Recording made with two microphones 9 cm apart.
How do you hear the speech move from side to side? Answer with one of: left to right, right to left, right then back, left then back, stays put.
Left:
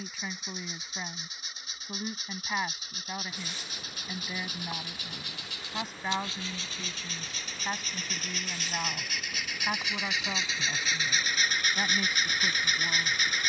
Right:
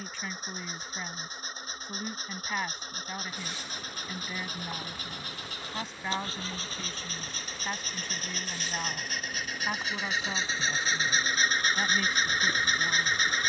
stays put.